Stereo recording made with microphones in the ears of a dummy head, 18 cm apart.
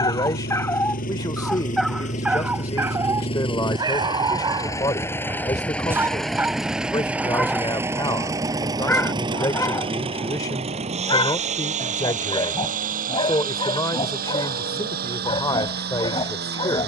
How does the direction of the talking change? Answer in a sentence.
You can hear the talking stay in one place.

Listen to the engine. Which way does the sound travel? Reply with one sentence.
In this clip you hear the engine go from the left side to the right.